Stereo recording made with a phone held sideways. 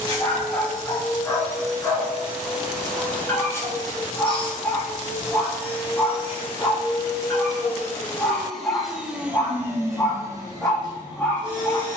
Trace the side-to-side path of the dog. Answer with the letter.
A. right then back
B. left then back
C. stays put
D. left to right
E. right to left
C.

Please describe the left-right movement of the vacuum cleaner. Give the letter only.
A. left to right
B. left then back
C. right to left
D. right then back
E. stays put
B.